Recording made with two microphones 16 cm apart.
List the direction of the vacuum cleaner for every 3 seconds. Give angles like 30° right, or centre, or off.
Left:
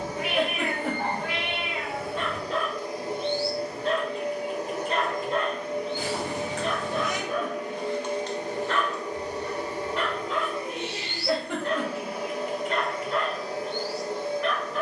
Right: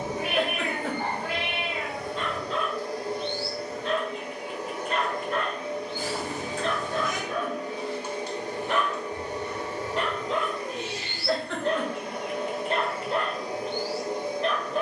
centre, 40° left, 50° left, 30° left, 10° right.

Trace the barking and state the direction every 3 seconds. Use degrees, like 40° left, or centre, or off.
60° left, 40° left, centre, 30° right, 30° right.